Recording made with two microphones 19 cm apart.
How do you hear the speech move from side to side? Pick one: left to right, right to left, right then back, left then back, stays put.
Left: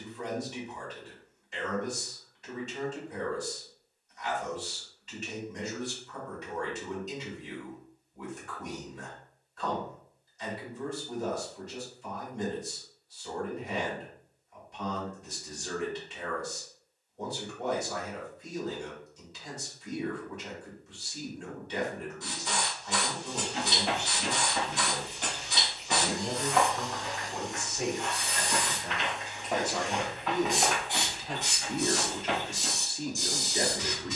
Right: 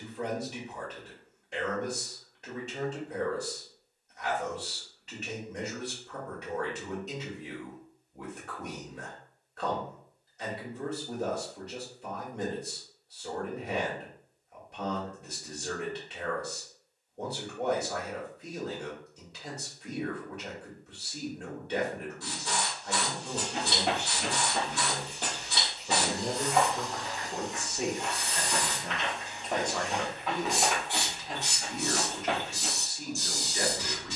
right to left.